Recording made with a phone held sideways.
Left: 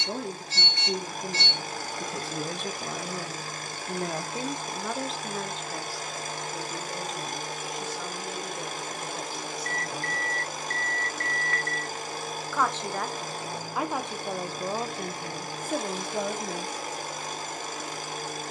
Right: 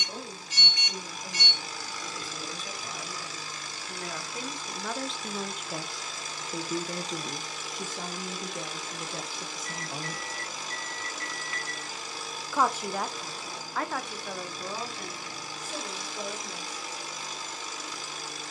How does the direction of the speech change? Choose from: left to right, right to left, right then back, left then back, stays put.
right then back.